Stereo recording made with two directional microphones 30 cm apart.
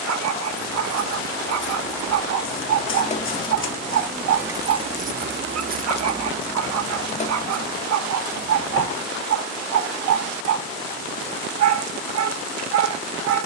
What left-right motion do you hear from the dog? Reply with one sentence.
In this clip you hear the dog stay in one place.